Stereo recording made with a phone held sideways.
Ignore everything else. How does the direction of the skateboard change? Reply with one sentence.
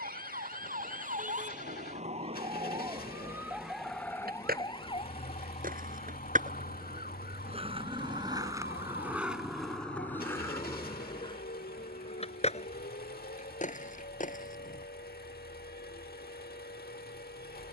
In this clip you hear the skateboard go from the right side to the left.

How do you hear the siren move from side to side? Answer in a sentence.
In this clip you hear the siren travel towards the left.